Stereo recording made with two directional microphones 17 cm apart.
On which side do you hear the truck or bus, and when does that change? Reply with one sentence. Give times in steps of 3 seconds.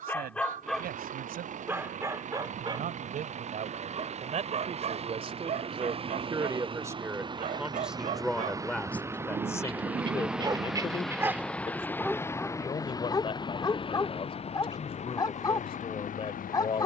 You can hear the truck or bus on the right from 0 s, in the centre from 9 s and on the left from 12 s.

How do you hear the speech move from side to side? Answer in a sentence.
In this clip you hear the speech go from the right side to the left.